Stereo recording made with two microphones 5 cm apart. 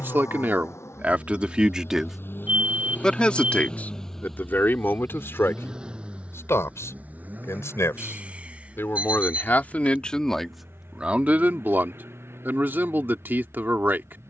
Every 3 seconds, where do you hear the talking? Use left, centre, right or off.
right, left, left, centre, right.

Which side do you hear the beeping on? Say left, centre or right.
right.